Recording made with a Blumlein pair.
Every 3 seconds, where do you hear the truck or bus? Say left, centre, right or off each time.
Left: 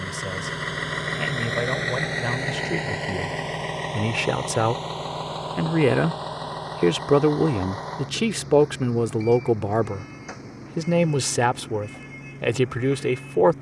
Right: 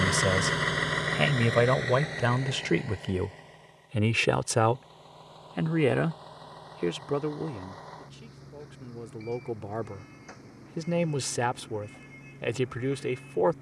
centre, left, left, left, left.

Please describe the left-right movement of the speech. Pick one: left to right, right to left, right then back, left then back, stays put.
right to left.